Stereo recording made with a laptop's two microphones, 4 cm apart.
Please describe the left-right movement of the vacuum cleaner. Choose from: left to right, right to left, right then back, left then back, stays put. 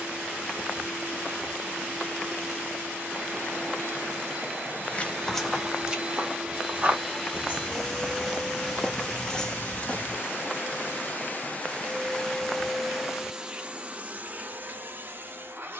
left then back.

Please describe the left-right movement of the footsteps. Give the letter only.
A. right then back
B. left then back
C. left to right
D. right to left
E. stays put
A.